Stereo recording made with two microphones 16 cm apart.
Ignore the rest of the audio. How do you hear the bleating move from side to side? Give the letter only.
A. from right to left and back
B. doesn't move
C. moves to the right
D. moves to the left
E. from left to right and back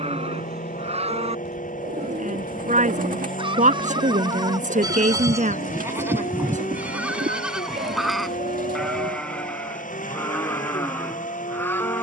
D.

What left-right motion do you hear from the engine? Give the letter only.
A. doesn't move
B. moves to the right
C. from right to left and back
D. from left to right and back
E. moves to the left
A.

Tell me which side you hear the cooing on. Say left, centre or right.
right.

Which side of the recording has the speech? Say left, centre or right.
right.